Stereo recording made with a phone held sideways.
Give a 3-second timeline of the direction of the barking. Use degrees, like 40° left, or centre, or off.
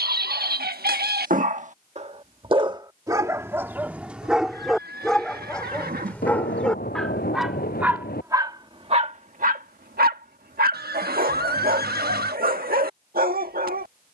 60° right, centre, centre, 70° right, 70° right.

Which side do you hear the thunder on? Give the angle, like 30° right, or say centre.
70° left.